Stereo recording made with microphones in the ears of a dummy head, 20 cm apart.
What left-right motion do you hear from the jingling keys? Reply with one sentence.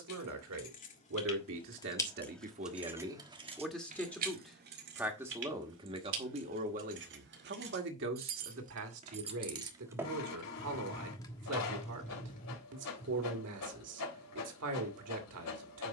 You can hear the jingling keys go right and come back.